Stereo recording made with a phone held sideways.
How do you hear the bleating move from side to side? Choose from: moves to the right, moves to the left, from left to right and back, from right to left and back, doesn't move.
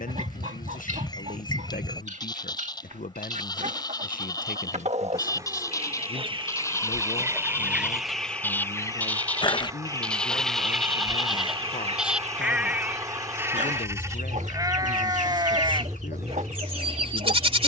moves to the right.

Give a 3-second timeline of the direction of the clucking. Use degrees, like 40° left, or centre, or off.
60° right, 50° right, 10° right, centre, 60° right, 60° right.